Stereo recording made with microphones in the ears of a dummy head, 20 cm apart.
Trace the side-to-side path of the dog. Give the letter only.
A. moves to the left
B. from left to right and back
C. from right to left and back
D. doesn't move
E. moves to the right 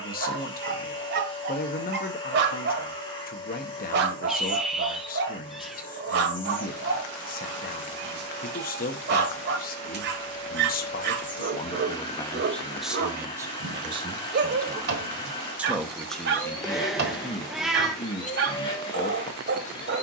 D.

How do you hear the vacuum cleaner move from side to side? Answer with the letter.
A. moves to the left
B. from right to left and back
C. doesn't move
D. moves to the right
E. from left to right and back
C.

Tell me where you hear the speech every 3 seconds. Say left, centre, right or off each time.
left, left, left, left, centre, centre, left.